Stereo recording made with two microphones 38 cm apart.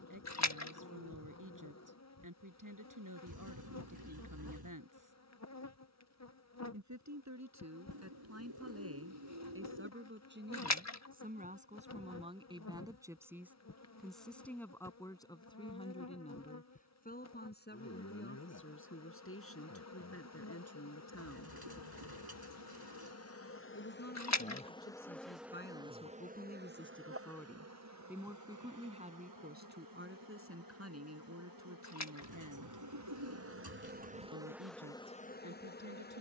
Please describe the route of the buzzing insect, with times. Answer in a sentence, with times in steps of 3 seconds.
In this clip you hear the buzzing insect on the left from 0 s, in the centre from 24 s, on the right from 27 s and in the centre from 33 s.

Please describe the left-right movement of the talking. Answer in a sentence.
You can hear the talking move from right to left and back again.